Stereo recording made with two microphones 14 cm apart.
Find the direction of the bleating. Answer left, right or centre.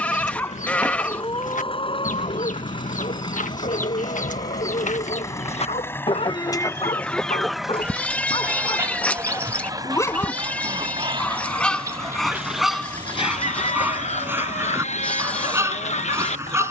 centre.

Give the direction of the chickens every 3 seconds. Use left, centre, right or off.
left, left, centre, right, left, left.